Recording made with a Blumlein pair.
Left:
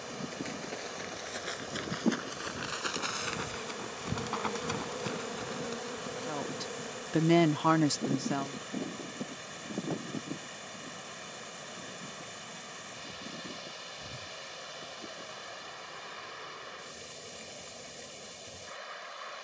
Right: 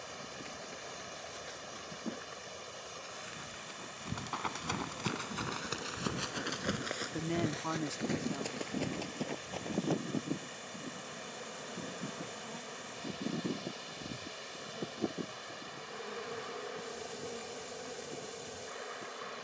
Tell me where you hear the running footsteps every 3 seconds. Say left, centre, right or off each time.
left, centre, right, right, off, off, off.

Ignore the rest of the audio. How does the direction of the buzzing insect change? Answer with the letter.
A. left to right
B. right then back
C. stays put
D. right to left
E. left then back
A.